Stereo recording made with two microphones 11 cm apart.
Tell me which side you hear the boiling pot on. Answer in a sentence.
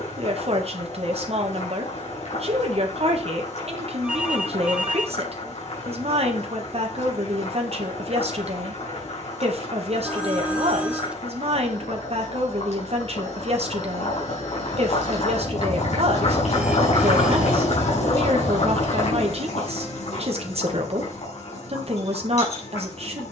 In this clip you hear the boiling pot on the left.